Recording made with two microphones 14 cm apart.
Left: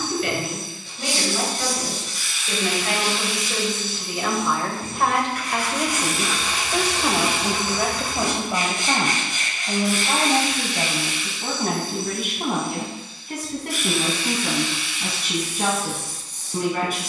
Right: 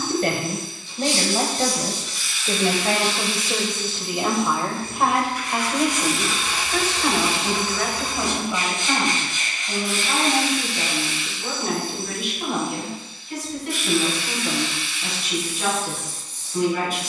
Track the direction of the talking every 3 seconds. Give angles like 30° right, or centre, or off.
40° right, 20° right, 20° left, 40° left, 60° left, 60° left.